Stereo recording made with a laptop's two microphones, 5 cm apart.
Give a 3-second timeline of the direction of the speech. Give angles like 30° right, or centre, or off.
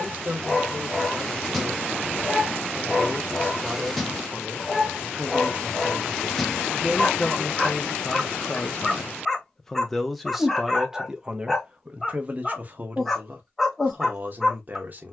40° right, 40° right, 10° left, 10° right, 40° right.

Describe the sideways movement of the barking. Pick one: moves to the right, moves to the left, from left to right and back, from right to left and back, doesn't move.
doesn't move.